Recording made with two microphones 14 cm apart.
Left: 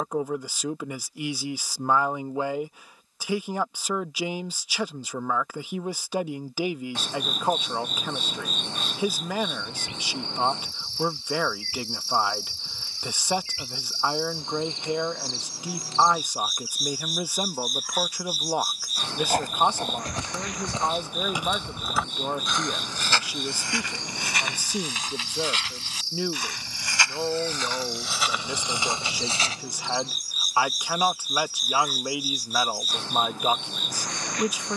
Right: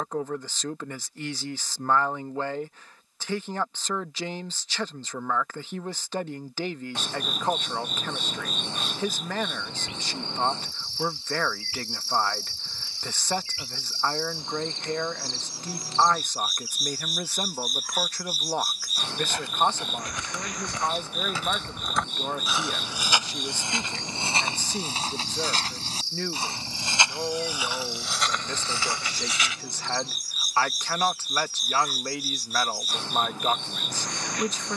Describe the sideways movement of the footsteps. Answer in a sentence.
You can hear the footsteps go right and come back.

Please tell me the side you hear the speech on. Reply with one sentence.
You can hear the speech in the centre.